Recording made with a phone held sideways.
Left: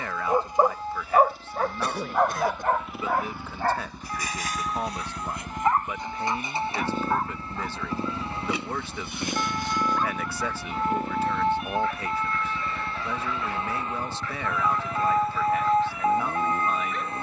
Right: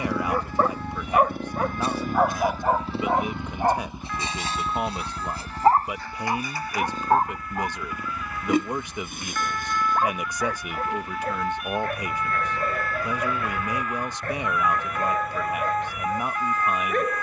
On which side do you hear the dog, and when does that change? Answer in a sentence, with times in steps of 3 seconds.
In this clip you hear the dog in the centre from 0 s and on the right from 3 s.